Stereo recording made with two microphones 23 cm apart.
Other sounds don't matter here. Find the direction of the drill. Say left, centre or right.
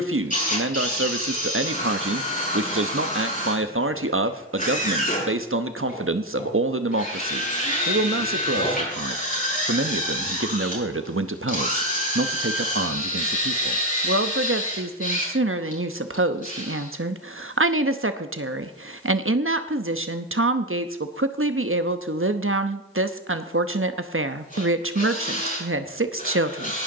left.